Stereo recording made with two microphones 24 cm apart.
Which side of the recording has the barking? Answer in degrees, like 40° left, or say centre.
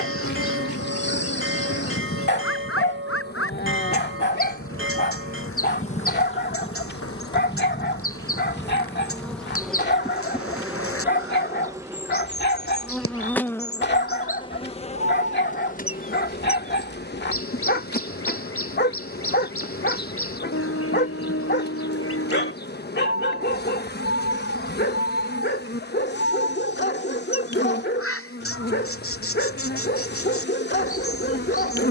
50° left.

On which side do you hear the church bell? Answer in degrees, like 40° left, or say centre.
60° right.